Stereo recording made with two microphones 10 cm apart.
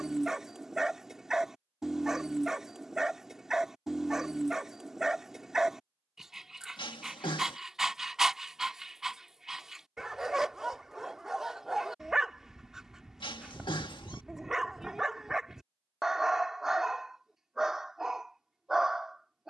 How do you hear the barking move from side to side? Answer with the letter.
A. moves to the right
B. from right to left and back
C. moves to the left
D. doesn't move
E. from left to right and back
D.